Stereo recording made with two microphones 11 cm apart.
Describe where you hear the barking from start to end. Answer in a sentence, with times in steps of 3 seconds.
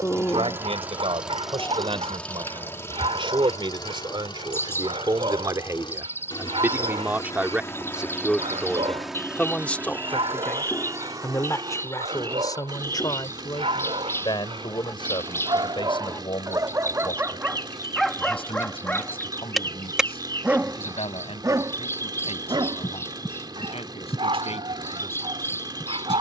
In this clip you hear the barking on the right from 0 s, in the centre from 18 s and on the right from 21 s.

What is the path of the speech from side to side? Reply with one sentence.
In this clip you hear the speech move from right to left.